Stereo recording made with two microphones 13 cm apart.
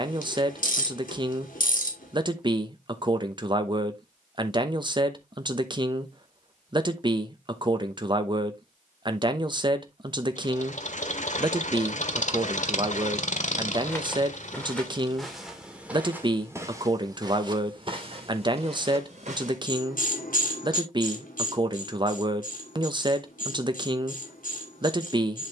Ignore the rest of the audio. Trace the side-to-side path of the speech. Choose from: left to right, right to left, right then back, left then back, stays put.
stays put.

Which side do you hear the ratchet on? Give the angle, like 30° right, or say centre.
80° left.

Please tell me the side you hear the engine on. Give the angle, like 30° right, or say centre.
60° left.